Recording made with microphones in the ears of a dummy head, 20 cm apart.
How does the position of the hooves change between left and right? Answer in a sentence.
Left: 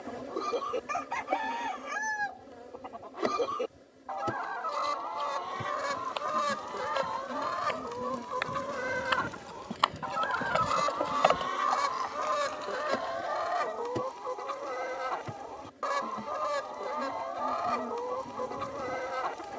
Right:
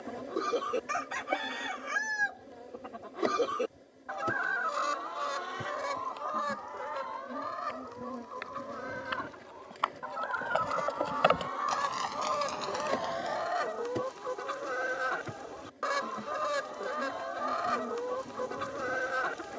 You can hear the hooves move to the right.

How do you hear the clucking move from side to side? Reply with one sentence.
You can hear the clucking move from right to left and back again.